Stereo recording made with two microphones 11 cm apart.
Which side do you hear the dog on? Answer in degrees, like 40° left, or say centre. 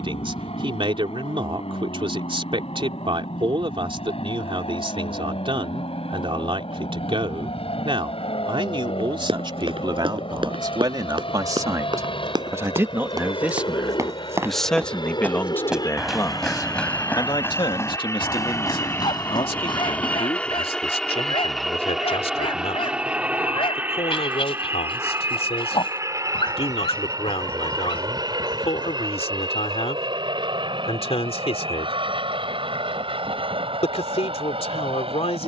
60° left.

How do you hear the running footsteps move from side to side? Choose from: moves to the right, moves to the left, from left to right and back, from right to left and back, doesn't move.
moves to the left.